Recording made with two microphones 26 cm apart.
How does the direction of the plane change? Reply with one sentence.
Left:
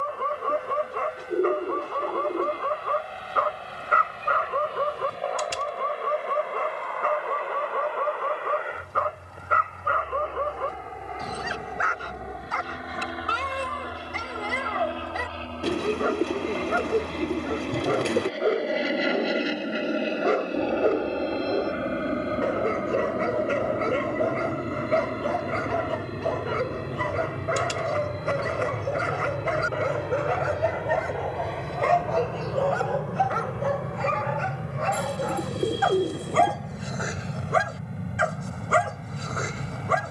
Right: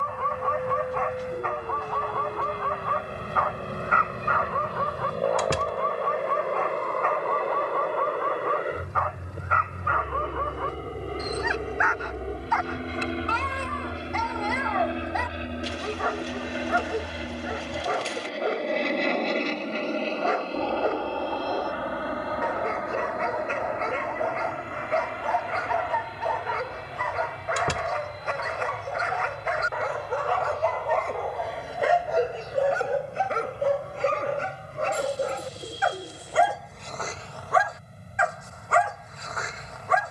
In this clip you hear the plane go from the right side to the left.